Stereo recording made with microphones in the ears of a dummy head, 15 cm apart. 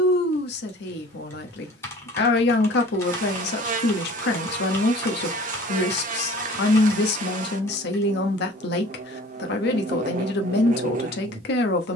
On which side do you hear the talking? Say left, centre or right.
left.